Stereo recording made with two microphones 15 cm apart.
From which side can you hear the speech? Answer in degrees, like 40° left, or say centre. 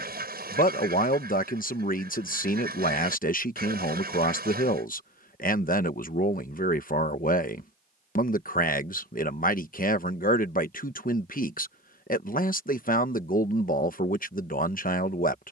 60° left.